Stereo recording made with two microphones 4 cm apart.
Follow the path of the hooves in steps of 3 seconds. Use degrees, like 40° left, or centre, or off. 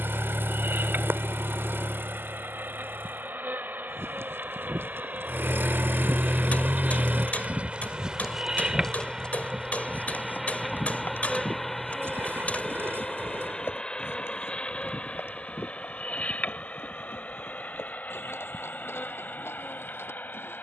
off, 70° right, 10° right, 50° left, 70° left, 70° left, 80° left.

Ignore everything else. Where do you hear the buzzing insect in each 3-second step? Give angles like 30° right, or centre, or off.
60° right, 50° right, 30° right, 10° right, 20° left, 40° left, 50° left.